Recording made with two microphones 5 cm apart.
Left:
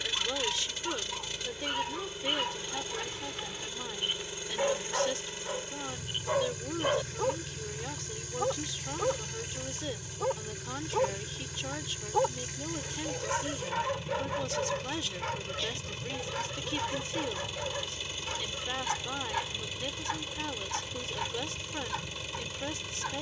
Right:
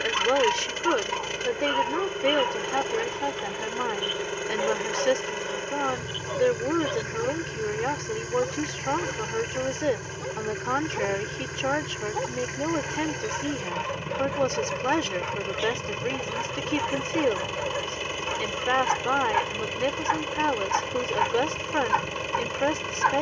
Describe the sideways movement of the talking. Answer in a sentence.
In this clip you hear the talking stay put.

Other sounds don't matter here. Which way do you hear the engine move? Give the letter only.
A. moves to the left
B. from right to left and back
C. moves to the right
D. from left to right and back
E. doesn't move
E.